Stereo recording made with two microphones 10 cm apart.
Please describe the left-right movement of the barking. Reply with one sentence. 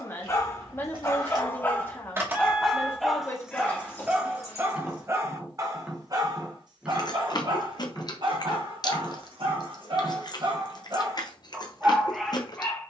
In this clip you hear the barking go right and come back.